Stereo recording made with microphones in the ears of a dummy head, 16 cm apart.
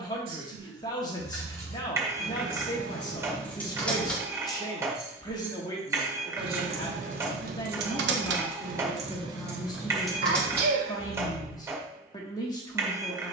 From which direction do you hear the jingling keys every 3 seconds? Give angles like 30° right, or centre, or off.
20° left, centre, 50° right, centre, off.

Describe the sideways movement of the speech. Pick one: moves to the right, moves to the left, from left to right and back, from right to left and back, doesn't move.
doesn't move.